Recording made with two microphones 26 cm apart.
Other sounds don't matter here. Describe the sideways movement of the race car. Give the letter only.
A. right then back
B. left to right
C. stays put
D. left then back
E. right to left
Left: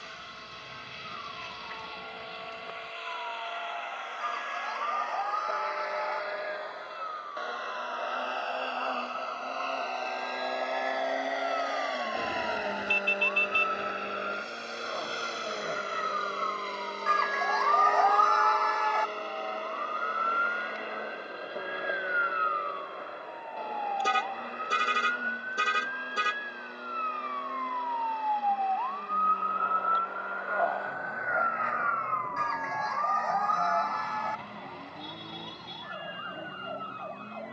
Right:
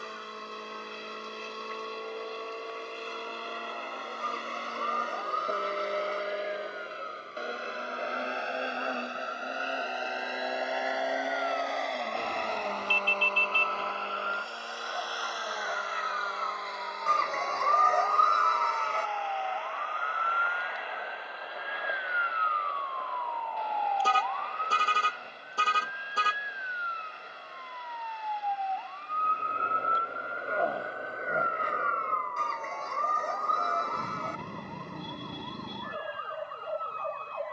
E.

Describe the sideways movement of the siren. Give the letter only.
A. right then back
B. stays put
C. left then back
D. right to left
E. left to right
E.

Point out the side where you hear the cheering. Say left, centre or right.
right.